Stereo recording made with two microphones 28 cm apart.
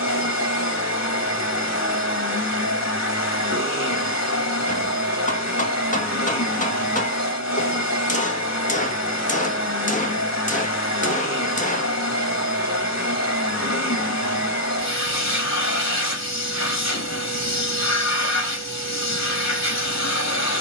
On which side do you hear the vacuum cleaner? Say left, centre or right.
left.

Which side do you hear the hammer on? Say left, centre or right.
left.